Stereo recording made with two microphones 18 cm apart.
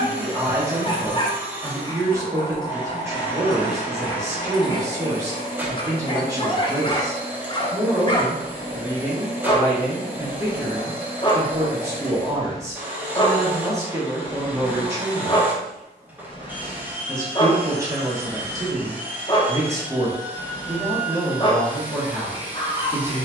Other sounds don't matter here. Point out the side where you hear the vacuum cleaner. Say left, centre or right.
centre.